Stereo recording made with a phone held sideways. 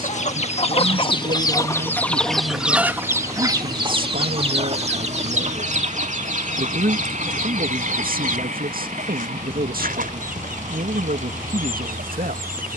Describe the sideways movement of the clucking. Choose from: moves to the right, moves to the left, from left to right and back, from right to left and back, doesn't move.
moves to the right.